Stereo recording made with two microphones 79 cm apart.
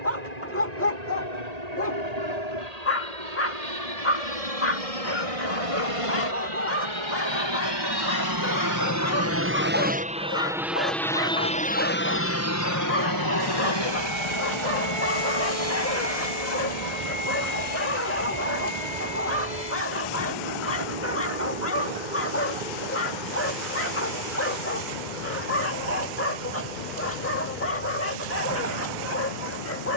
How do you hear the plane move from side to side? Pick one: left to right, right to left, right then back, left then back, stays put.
right to left.